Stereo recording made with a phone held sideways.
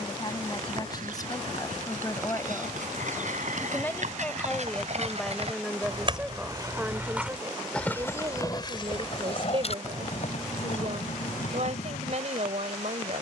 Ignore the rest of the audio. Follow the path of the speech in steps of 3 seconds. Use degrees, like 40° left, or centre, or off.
30° left, 10° left, 20° right, 50° right, 50° right.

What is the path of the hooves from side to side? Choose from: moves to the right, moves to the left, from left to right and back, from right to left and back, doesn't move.
moves to the left.